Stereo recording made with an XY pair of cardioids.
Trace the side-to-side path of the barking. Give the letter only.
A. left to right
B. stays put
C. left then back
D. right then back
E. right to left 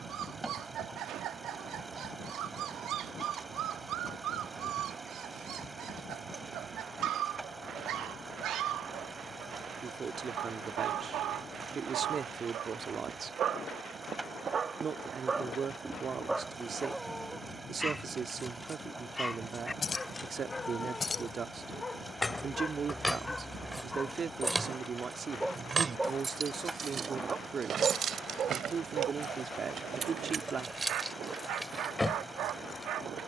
C.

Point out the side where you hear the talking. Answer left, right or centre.
right.